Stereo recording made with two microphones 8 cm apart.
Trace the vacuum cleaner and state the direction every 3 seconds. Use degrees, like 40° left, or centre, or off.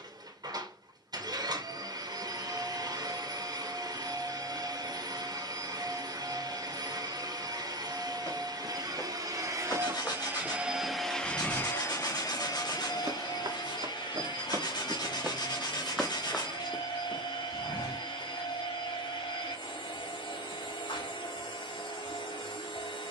50° right, 50° right, 50° right, 10° right, 60° left, 80° left, 80° left, 80° left.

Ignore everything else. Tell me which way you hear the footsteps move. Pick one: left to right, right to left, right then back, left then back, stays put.
right then back.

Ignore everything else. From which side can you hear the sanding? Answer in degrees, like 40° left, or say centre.
60° left.